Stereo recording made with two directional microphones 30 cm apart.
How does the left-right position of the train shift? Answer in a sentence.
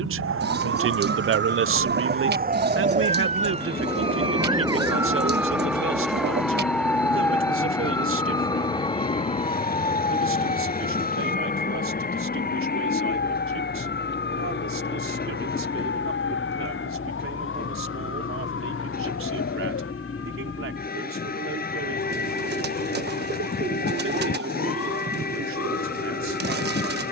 You can hear the train stay put.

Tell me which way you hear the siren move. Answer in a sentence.
You can hear the siren move to the left.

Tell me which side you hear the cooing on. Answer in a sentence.
In this clip you hear the cooing on the right.